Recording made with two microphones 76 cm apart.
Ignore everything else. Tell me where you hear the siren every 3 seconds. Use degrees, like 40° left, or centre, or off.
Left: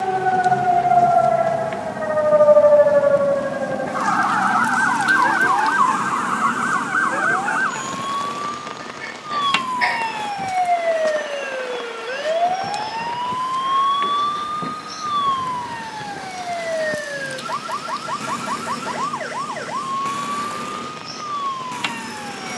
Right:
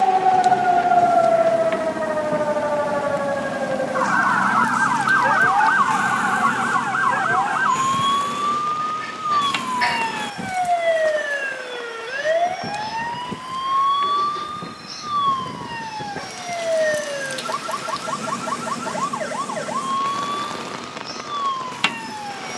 30° left, 10° right, 30° right, 40° right, 50° right, 60° right, 60° right, 60° right.